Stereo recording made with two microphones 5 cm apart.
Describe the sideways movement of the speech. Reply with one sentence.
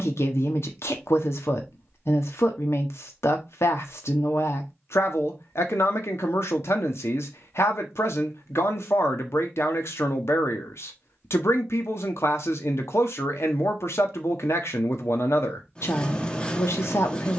In this clip you hear the speech stay put.